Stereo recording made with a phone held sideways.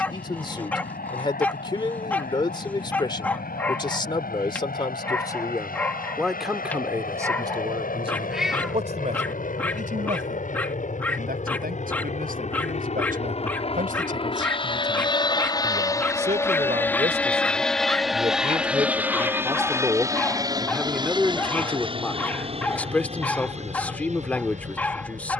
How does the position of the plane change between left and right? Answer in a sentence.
In this clip you hear the plane travel towards the right.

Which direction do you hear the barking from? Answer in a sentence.
You can hear the barking in the centre.